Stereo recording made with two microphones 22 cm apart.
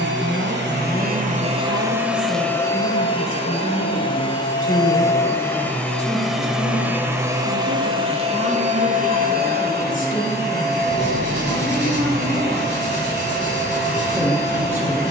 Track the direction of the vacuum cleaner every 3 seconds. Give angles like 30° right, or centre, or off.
30° right, 20° left, 20° right, 50° right, 50° right.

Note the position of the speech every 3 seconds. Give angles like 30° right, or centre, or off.
70° left, 70° left, 60° left, 30° left, centre.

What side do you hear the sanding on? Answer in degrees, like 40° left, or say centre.
60° left.